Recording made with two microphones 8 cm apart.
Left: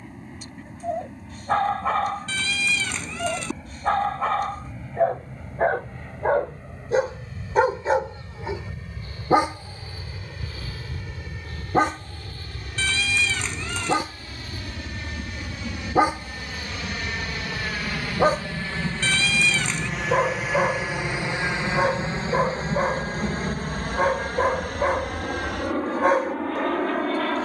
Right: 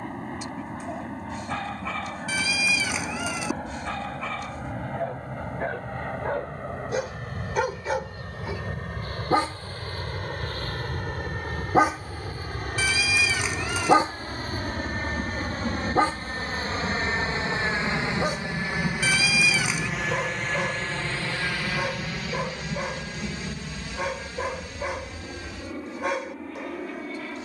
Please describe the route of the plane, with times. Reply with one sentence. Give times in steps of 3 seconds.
You can hear the plane on the right from 0 s, in the centre from 18 s and on the left from 21 s.